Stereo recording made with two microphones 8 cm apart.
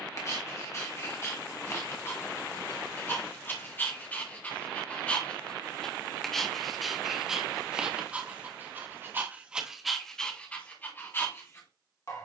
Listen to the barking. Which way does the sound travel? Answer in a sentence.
You can hear the barking go right and come back.